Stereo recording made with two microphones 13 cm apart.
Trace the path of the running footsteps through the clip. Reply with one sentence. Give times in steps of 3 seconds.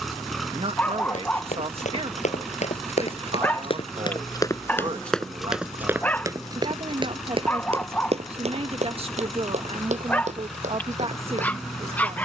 In this clip you hear the running footsteps on the left from 0 s and on the right from 6 s.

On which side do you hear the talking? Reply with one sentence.
In this clip you hear the talking on the right.